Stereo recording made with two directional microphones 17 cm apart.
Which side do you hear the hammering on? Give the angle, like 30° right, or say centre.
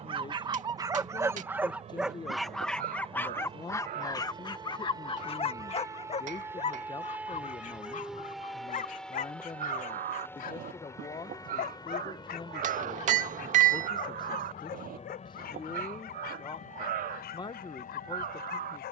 50° right.